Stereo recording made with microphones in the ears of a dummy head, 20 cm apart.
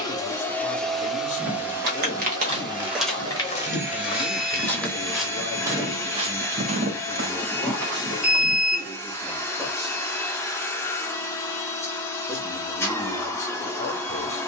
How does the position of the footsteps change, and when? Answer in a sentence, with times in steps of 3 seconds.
In this clip you hear the footsteps on the right from 0 s, in the centre from 3 s, on the right from 6 s and not at all from 9 s.